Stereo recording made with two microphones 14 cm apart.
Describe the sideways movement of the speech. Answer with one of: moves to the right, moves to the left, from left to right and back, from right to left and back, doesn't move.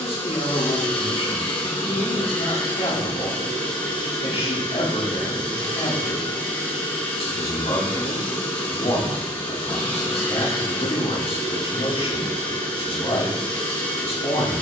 doesn't move.